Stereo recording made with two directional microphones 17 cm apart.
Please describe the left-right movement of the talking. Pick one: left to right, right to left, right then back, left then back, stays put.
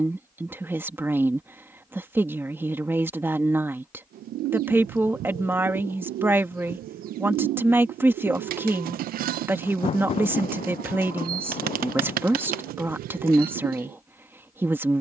stays put.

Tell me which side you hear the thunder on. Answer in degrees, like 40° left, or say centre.
40° left.